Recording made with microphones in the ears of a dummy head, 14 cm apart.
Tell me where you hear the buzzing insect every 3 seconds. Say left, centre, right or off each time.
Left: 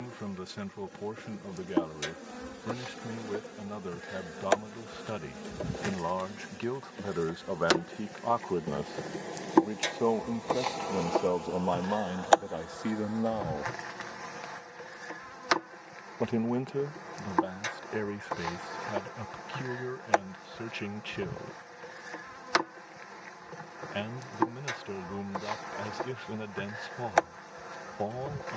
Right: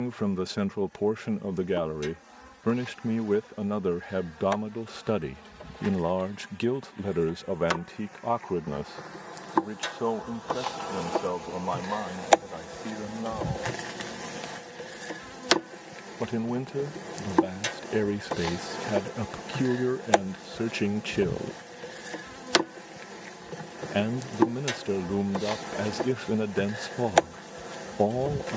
left, left, left, centre, right, right, right, right, right, right.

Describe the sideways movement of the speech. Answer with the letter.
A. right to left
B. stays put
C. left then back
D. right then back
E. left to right
C.